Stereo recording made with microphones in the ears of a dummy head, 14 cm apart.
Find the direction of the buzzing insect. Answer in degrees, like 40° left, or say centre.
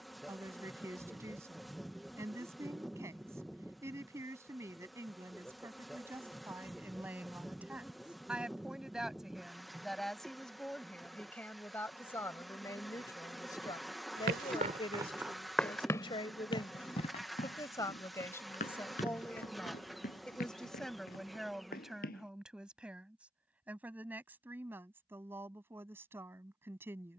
centre.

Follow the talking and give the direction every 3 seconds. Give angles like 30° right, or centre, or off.
20° right, 20° right, 10° right, centre, 20° left, 30° left, 10° left, centre, 10° right.